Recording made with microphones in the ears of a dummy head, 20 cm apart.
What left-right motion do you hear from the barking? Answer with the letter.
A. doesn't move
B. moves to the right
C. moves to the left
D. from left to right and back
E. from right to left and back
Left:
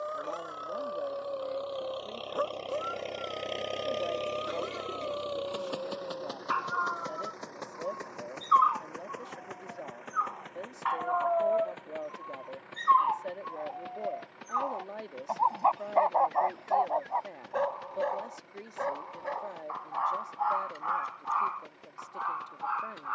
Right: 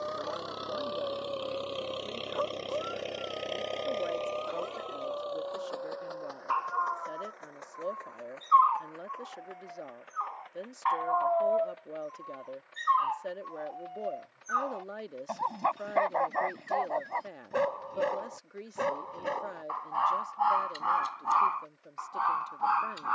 B.